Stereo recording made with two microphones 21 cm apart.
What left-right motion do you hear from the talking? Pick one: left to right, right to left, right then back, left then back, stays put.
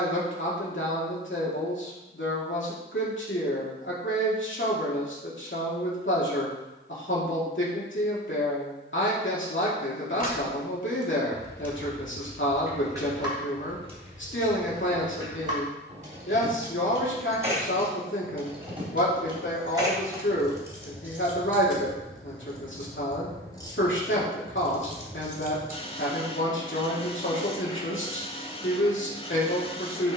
stays put.